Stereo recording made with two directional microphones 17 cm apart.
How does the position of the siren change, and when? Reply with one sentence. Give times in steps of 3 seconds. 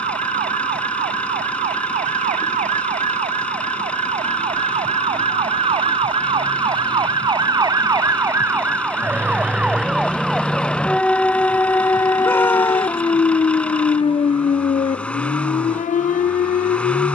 In this clip you hear the siren on the right from 0 s, in the centre from 9 s and on the left from 12 s.